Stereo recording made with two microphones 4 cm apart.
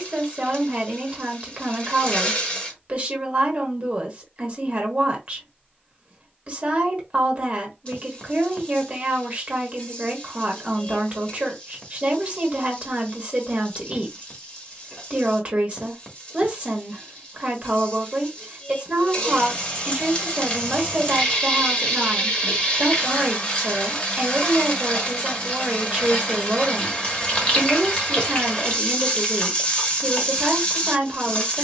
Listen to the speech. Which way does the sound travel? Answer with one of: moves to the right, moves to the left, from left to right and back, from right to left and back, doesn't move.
doesn't move.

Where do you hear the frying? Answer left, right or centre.
left.